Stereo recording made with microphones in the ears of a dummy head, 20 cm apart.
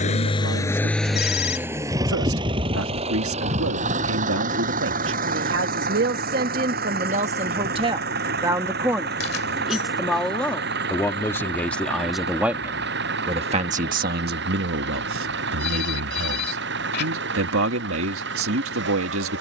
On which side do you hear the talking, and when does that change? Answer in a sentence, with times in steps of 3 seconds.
In this clip you hear the talking on the right from 0 s, in the centre from 9 s and on the right from 12 s.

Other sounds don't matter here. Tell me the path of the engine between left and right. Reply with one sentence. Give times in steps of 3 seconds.
You can hear the engine in the centre from 0 s and on the right from 3 s.